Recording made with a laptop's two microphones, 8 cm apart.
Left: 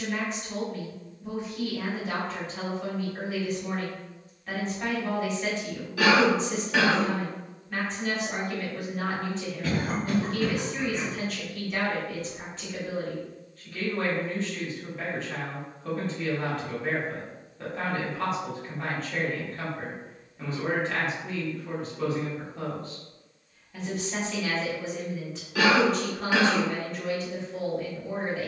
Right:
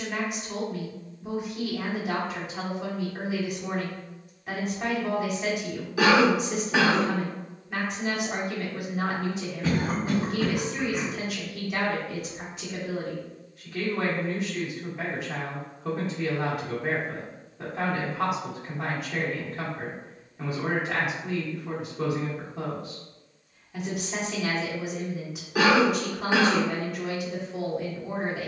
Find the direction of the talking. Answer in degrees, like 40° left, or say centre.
10° right.